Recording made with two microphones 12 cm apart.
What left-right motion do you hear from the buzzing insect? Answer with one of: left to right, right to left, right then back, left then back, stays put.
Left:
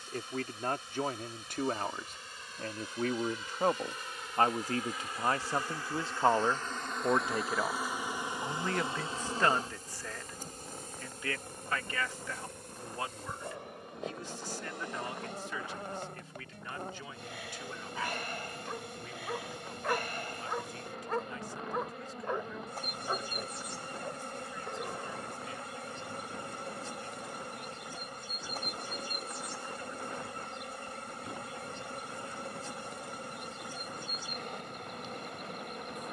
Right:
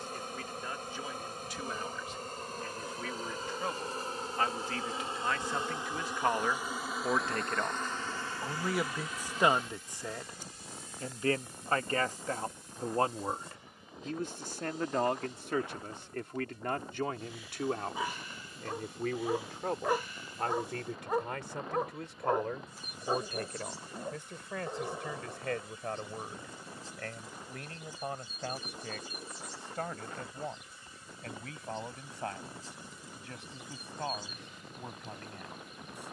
right to left.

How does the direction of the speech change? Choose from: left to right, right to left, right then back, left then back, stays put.
left to right.